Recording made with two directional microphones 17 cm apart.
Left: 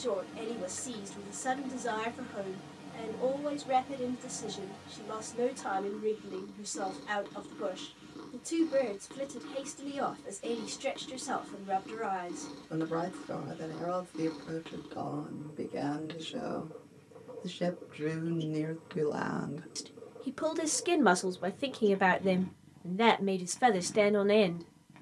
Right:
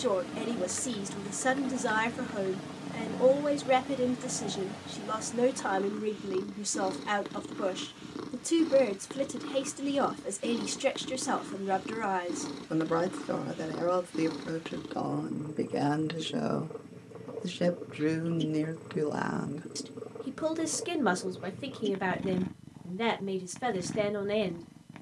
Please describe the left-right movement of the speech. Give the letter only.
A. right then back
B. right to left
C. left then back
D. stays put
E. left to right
B.